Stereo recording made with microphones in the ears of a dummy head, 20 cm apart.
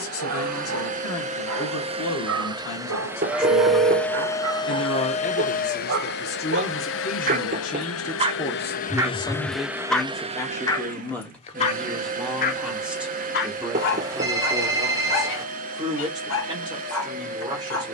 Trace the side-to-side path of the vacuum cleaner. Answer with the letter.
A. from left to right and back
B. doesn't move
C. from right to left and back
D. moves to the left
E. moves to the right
C.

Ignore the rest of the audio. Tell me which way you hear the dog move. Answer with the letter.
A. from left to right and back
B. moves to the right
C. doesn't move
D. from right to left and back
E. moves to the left
E.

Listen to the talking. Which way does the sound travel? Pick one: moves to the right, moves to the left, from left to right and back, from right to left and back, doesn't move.
moves to the right.